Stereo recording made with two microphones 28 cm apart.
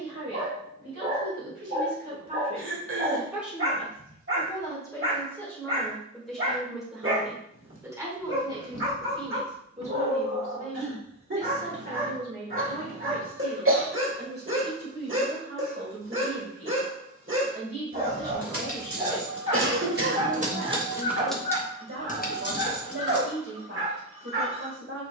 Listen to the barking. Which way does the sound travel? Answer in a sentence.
In this clip you hear the barking stay in one place.